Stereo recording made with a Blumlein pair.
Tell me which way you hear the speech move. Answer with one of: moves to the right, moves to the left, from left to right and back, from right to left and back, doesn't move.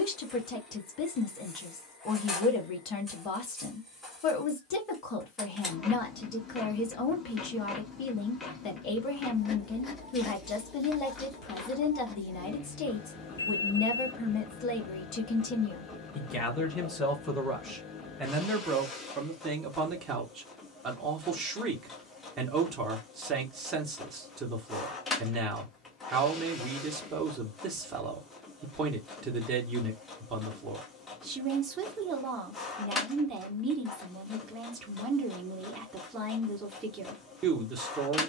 moves to the right.